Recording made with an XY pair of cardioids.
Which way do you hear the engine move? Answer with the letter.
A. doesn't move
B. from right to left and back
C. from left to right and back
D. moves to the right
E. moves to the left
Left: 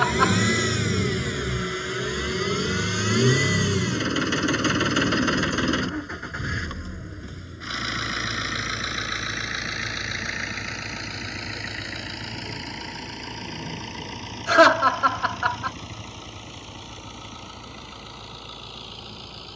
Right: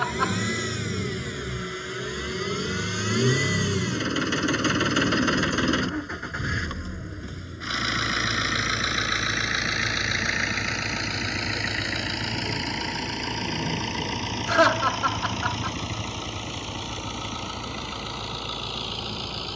D.